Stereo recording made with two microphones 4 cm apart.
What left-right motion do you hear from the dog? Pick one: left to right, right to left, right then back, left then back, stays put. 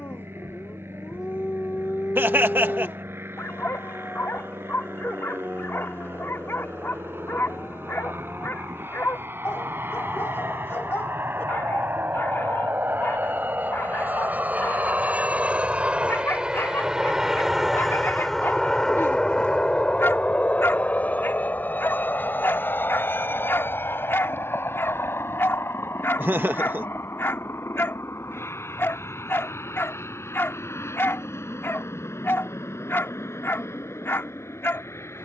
stays put.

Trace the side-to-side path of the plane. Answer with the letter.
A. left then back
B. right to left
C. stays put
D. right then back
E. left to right
B.